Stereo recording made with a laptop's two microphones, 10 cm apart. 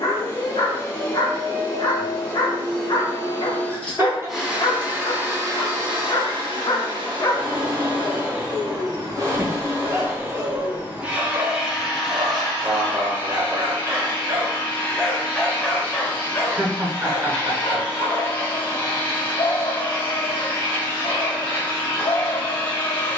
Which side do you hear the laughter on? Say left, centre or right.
right.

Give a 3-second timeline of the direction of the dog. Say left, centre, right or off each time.
left, left, left, right, right, left, left, left.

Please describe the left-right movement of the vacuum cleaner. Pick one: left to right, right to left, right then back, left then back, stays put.
right then back.